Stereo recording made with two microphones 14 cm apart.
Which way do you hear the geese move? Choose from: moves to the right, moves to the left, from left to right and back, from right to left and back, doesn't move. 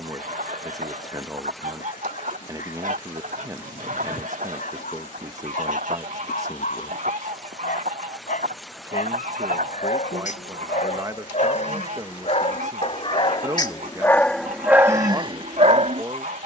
doesn't move.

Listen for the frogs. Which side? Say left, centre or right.
right.